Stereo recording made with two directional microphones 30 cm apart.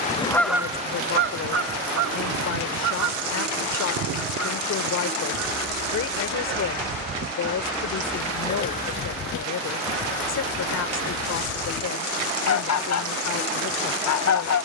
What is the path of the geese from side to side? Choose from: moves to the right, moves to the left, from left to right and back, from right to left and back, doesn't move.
from left to right and back.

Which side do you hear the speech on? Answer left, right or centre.
left.